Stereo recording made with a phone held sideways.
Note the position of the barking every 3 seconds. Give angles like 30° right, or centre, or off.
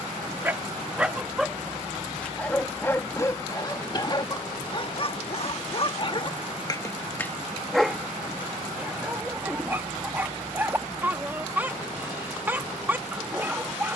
centre, 30° left, 10° left, 10° right, 10° right.